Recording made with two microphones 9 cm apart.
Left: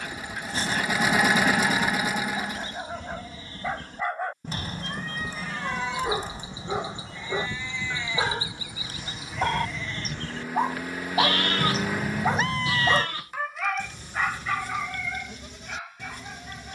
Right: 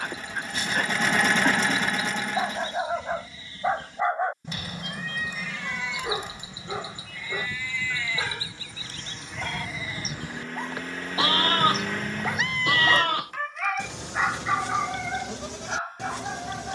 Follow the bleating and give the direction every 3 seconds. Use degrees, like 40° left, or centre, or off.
50° left, 40° left, 30° left, 20° right, 70° right, 80° right.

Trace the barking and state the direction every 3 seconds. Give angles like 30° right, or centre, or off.
40° right, 10° right, 30° left, 50° left, centre, 40° right.